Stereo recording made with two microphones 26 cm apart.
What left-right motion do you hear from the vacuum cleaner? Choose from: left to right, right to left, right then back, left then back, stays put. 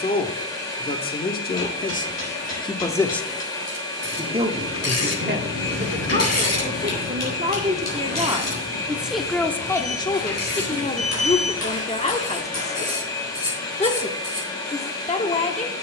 stays put.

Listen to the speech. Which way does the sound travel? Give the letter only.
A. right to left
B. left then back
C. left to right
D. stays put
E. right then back
E.